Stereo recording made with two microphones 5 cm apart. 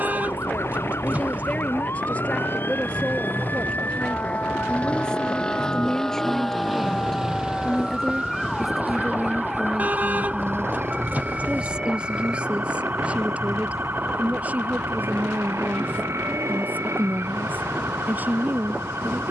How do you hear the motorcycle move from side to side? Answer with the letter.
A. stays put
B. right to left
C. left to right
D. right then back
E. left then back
C.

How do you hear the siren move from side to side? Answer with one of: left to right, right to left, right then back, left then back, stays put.
left to right.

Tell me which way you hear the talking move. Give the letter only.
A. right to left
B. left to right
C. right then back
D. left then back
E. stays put
B.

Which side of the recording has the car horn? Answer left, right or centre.
right.